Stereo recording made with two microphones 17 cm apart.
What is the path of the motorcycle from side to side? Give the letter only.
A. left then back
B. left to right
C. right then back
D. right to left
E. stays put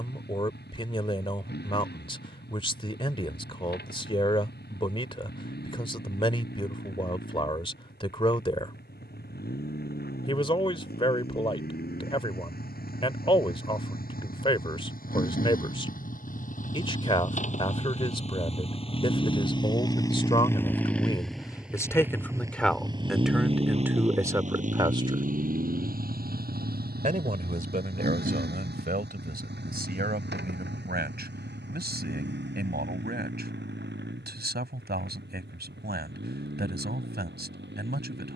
B.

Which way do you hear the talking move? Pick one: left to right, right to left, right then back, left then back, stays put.
left to right.